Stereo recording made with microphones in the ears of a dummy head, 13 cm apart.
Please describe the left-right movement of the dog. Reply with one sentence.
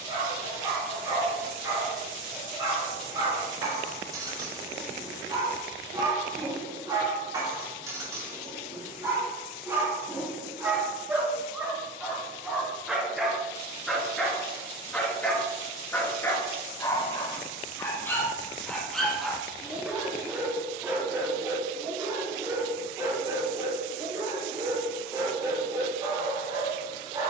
You can hear the dog go left and come back.